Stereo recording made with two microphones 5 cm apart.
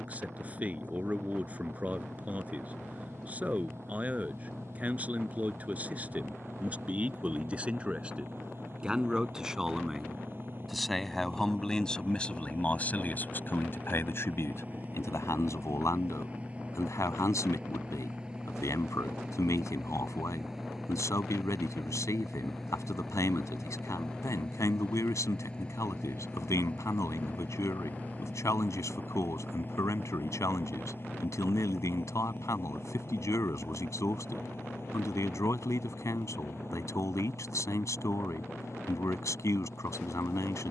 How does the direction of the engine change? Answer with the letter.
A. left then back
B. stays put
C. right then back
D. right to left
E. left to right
D.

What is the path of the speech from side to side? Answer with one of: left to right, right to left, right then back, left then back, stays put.
right to left.